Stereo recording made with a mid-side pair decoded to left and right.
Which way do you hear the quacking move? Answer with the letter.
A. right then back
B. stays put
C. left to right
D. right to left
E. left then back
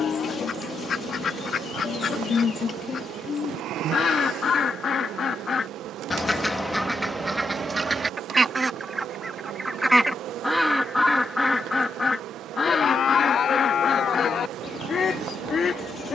A.